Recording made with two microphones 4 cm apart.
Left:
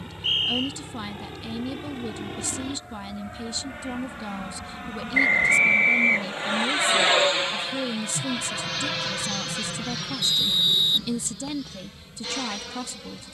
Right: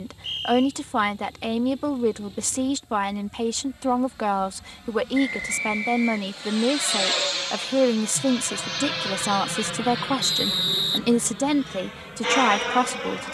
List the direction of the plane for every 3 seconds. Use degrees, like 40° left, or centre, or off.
70° left, 50° left, 20° left, 20° right, 50° right.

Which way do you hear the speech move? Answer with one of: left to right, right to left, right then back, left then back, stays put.
stays put.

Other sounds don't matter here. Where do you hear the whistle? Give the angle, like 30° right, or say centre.
50° left.